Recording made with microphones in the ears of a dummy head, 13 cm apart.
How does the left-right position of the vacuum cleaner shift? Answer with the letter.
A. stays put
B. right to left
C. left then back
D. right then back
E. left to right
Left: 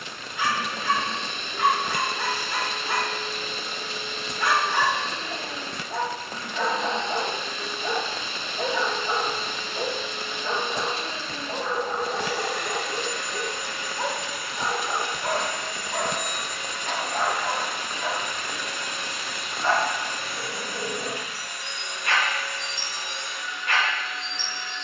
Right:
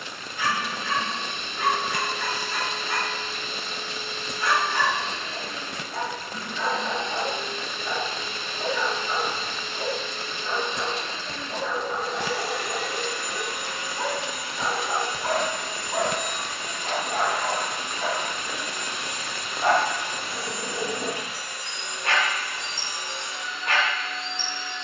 E.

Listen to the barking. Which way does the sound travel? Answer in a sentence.
In this clip you hear the barking move from left to right.